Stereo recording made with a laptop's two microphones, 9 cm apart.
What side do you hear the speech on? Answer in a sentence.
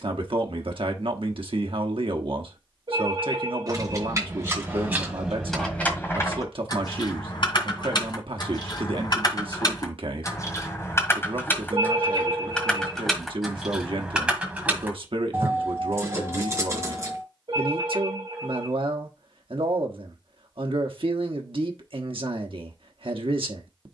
In this clip you hear the speech on the right.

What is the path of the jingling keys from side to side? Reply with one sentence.
In this clip you hear the jingling keys go left and come back.